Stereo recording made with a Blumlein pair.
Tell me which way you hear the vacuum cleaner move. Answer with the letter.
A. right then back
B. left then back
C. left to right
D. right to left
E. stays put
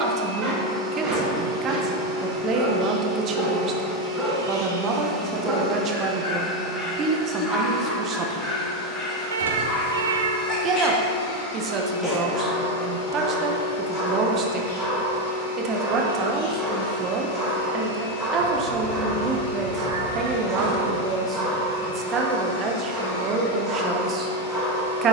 D.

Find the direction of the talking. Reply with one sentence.
In this clip you hear the talking on the right.